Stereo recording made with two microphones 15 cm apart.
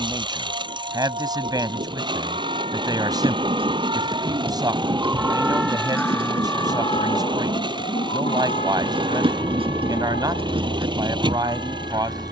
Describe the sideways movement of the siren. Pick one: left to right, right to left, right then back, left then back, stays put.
right to left.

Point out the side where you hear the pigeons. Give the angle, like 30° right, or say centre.
40° right.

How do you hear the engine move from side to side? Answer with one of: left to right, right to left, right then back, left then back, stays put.
stays put.